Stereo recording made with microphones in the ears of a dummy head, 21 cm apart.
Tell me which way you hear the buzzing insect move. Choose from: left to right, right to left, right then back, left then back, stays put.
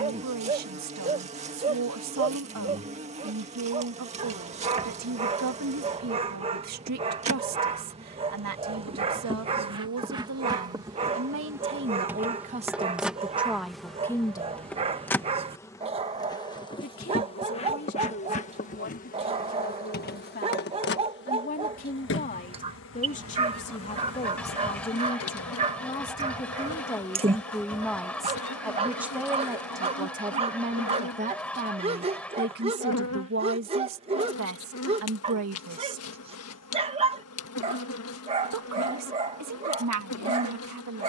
right to left.